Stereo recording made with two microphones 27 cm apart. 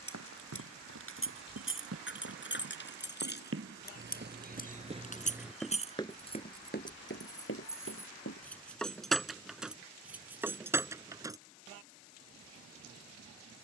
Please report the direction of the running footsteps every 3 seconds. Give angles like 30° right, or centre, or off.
70° right, 30° right, 40° left, off, off.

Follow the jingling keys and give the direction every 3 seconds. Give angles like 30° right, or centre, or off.
50° left, 30° left, 10° left, 10° right, off.